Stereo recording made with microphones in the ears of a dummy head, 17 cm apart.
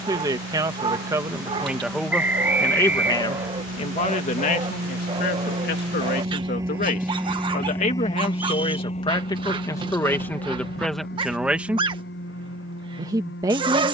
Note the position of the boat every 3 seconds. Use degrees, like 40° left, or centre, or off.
70° right, 50° right, centre, 50° left, 60° left.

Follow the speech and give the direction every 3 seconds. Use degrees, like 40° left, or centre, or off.
10° right, 40° left, 40° left, 10° left, 20° right.